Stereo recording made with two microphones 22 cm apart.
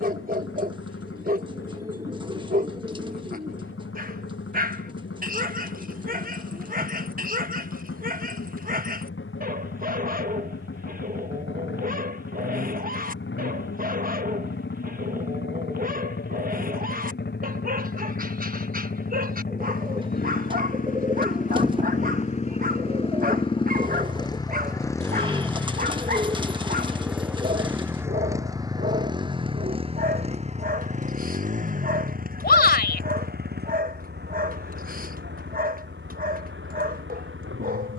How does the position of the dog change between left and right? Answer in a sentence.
In this clip you hear the dog stay in one place.